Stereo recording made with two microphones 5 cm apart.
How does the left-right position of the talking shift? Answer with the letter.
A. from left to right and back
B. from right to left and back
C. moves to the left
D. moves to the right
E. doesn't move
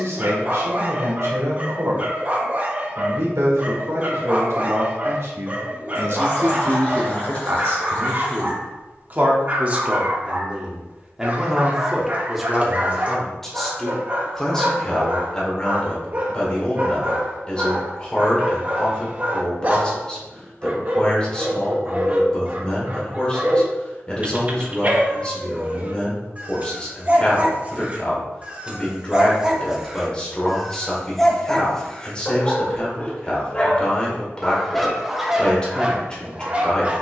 C.